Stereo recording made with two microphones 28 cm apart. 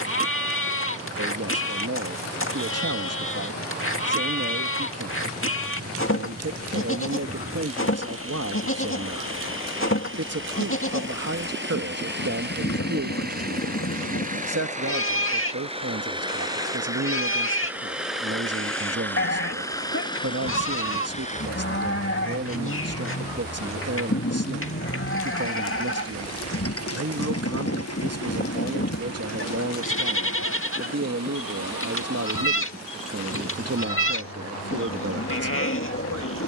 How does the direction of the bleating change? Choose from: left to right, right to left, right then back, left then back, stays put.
stays put.